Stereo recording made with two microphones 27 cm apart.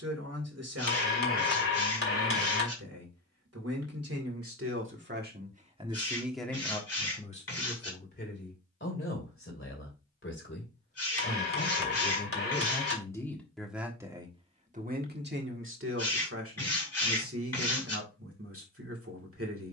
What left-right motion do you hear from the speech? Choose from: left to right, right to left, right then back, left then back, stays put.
left then back.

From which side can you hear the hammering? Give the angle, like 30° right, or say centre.
50° left.